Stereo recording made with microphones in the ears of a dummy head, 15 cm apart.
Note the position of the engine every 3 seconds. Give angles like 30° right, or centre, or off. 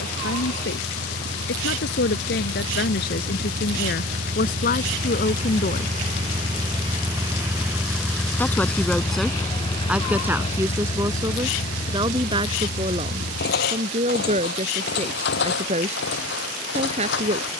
70° right, 50° right, 10° right, 40° left, 60° left, 70° left.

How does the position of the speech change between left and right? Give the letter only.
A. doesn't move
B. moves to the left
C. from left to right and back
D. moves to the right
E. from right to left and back
D.